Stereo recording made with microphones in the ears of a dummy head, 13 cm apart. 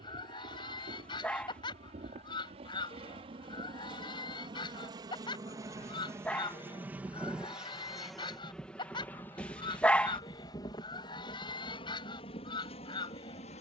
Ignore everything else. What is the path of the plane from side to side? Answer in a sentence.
In this clip you hear the plane move to the left.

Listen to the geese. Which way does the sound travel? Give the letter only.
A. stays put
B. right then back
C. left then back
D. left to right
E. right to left
A.